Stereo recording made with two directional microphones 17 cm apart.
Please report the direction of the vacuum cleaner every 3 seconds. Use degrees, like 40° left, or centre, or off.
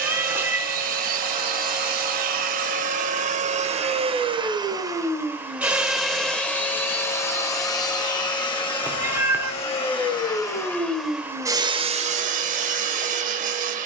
60° right, 30° right, 20° left, 10° left, 50° right.